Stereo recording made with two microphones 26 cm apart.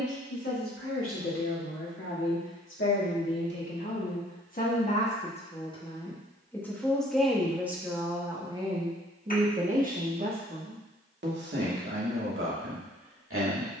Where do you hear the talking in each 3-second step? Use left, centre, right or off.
left, left, centre, right, right.